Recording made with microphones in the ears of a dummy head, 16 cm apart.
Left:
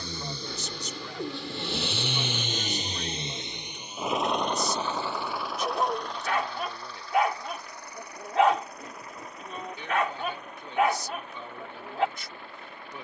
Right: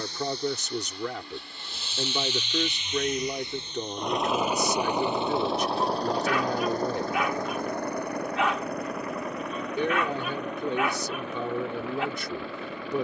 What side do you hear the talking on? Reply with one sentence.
In this clip you hear the talking on the right.